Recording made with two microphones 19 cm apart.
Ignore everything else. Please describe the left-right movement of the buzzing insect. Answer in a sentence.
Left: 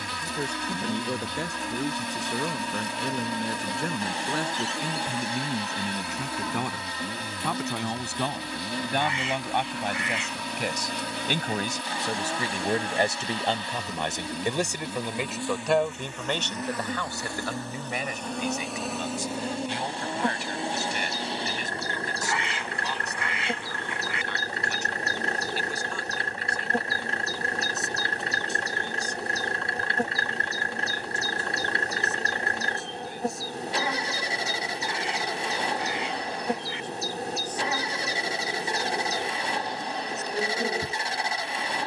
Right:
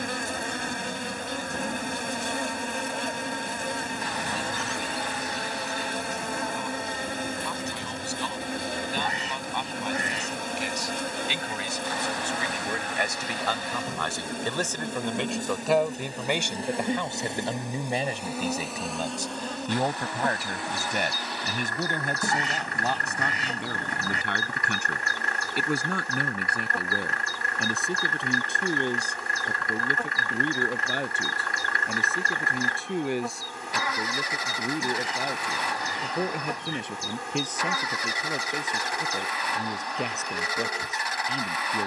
In this clip you hear the buzzing insect go from the right side to the left.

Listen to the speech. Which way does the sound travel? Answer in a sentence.
In this clip you hear the speech move from left to right.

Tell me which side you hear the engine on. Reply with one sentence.
You can hear the engine on the left.